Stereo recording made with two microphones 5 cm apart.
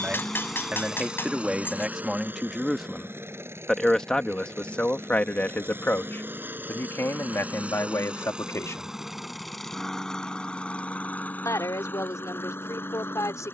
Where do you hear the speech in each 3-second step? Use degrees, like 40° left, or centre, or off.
20° right, 20° left, 60° left, 80° left, 80° left.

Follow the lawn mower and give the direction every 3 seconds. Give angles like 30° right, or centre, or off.
20° right, 50° right, 20° right, 20° left, 50° left.